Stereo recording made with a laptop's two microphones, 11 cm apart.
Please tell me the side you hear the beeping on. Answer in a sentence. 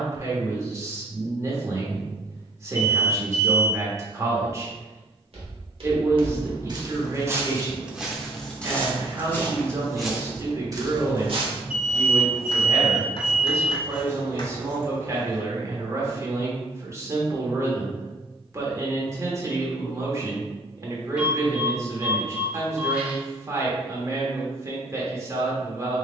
In this clip you hear the beeping in the centre.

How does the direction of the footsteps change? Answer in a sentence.
You can hear the footsteps move from right to left and back again.